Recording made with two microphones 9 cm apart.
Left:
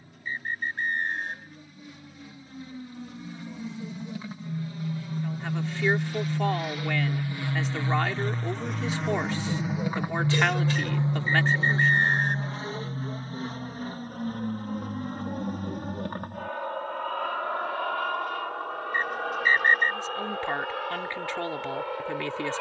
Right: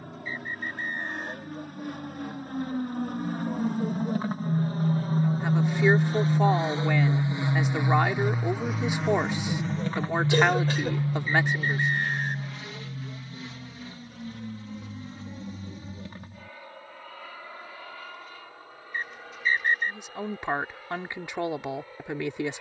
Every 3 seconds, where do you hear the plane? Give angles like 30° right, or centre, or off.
70° right, 50° right, 20° right, 10° left, 40° left, 50° left, 60° left, 60° left.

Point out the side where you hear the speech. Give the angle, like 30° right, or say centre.
20° right.